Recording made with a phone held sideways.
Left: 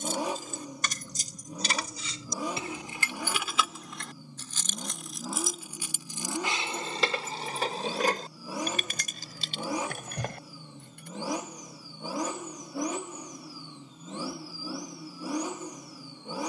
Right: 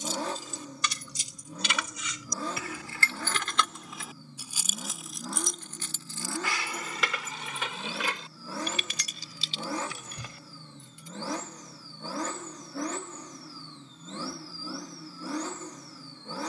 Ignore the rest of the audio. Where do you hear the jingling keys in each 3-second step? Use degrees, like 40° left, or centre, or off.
40° left, centre, 30° left, 60° left, off, off.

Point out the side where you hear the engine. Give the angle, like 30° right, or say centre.
10° left.